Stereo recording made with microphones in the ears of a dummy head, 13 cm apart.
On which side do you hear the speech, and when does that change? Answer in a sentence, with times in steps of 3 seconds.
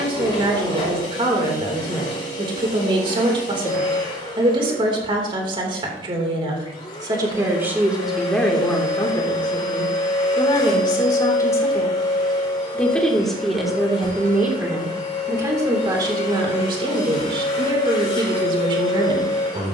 You can hear the speech on the right from 0 s, in the centre from 6 s, on the left from 9 s, in the centre from 12 s and on the right from 15 s.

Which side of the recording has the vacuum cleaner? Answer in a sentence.
In this clip you hear the vacuum cleaner on the left.